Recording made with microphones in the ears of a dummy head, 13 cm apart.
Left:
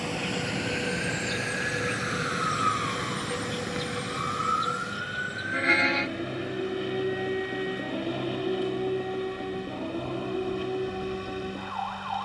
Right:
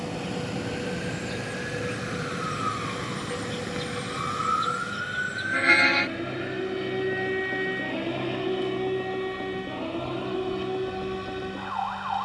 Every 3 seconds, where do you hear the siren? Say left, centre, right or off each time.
left, centre, right, right.